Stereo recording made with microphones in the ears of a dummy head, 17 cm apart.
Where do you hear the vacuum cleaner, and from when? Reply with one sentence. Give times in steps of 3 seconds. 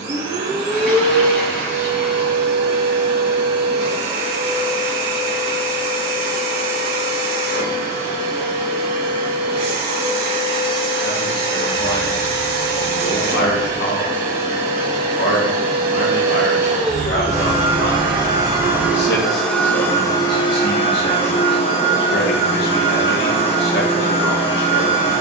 In this clip you hear the vacuum cleaner on the right from 0 s, in the centre from 18 s and on the left from 21 s.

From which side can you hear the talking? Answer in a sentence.
In this clip you hear the talking on the left.